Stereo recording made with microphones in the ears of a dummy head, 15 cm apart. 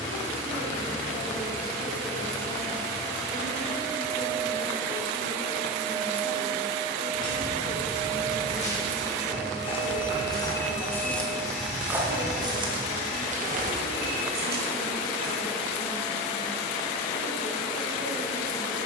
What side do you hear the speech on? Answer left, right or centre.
left.